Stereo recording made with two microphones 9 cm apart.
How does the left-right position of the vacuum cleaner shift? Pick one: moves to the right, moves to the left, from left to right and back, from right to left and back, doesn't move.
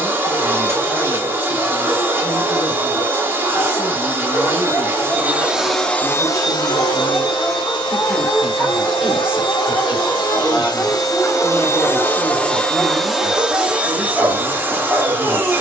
from right to left and back.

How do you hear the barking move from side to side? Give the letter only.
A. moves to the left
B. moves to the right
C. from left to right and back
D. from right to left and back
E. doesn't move
B.